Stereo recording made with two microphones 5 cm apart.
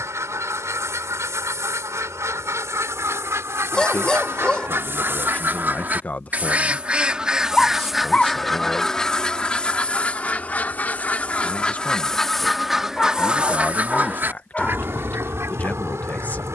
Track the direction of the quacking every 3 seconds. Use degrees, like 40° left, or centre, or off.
70° right, 50° right, 10° right, 20° left, 20° right, 60° right.